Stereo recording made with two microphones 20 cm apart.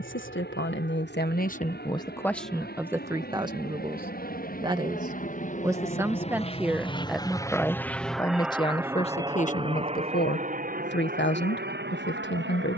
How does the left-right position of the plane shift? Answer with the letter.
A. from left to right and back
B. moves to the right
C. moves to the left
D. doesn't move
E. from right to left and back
B.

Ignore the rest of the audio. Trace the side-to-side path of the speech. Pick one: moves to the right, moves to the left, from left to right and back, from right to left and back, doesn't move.
from left to right and back.